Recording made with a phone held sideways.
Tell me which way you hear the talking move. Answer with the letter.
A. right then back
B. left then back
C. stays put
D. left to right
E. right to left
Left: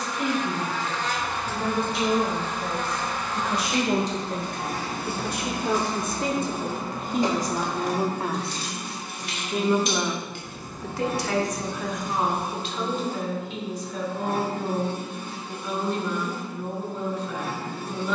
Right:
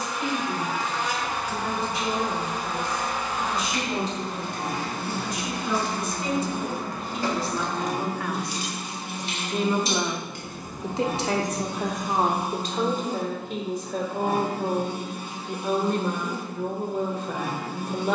D.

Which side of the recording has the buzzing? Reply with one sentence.
In this clip you hear the buzzing in the centre.